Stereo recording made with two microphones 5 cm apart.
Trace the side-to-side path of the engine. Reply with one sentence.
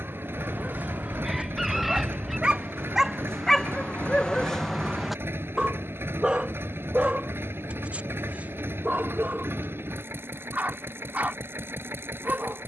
In this clip you hear the engine stay put.